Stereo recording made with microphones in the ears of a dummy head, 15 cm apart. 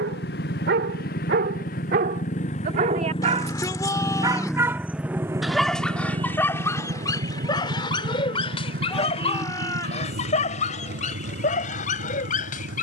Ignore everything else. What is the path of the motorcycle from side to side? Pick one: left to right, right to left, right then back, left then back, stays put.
left to right.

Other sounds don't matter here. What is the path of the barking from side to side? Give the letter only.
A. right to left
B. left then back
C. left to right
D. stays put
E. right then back
A.